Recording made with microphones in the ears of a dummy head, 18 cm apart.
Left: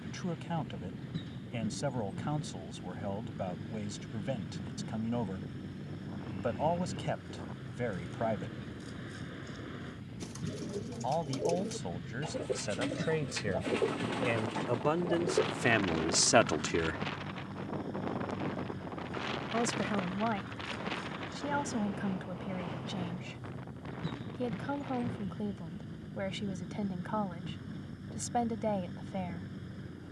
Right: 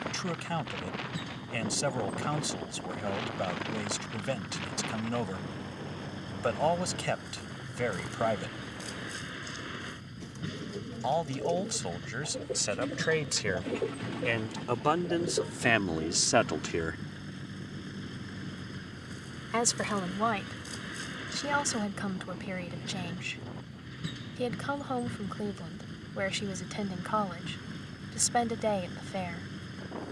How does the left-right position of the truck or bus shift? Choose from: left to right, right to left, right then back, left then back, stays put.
stays put.